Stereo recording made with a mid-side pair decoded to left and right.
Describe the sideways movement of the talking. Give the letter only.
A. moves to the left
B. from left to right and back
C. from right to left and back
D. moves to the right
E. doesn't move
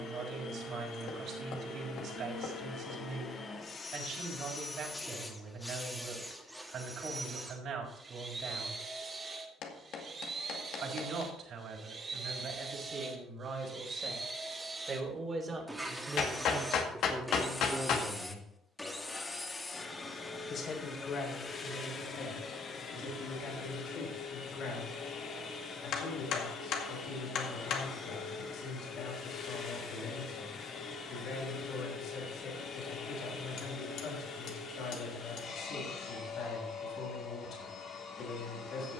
A.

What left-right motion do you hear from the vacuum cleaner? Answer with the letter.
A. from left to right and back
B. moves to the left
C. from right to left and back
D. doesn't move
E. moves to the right
A.